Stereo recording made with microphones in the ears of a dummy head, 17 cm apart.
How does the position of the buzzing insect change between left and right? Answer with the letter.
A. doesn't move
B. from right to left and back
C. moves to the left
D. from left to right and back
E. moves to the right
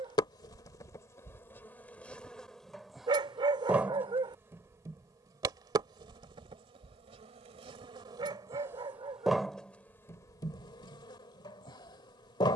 D.